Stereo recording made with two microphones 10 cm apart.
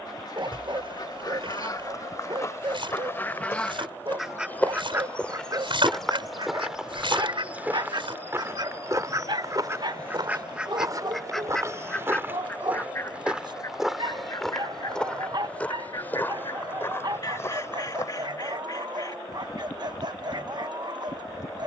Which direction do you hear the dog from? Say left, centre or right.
right.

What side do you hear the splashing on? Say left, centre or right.
right.